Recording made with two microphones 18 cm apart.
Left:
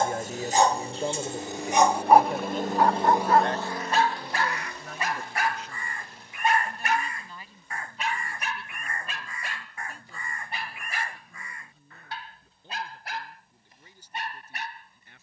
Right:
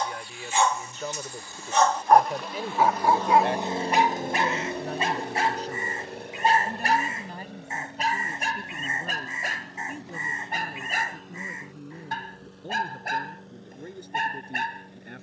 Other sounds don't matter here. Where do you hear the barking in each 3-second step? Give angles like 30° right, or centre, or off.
20° left, 20° right, 40° right, 50° right, 50° right.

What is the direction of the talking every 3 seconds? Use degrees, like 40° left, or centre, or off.
20° left, 30° right, 50° right, 50° right, 60° right.